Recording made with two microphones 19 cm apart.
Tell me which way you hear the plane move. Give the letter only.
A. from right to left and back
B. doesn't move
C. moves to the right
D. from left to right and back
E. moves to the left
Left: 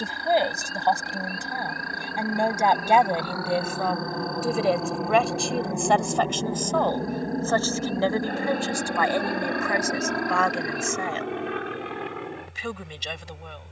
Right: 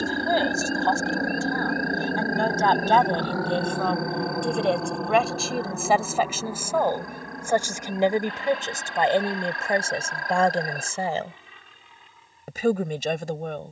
E.